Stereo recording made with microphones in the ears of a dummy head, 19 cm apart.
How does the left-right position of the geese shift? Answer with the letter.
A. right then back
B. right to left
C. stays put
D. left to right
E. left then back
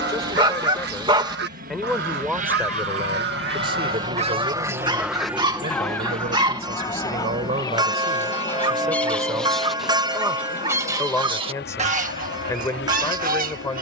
E.